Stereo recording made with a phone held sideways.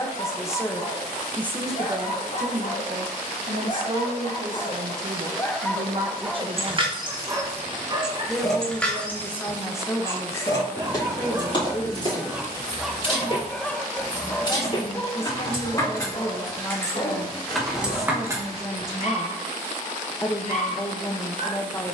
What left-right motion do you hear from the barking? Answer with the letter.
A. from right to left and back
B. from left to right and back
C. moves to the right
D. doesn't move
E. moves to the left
B.